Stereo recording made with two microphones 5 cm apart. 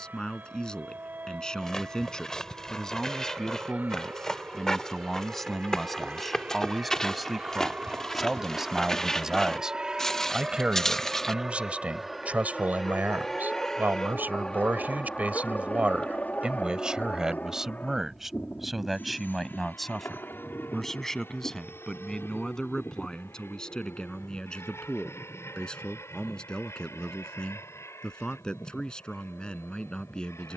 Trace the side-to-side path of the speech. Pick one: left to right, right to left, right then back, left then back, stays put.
right then back.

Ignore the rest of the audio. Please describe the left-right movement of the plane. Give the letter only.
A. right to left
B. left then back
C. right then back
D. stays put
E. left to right
A.